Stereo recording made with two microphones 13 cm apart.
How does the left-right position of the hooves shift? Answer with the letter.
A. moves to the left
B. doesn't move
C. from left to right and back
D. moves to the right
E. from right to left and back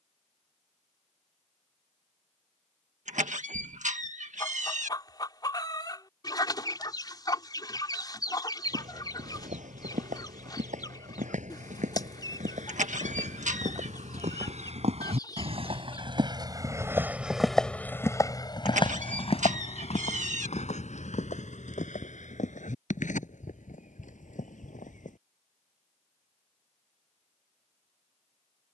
A.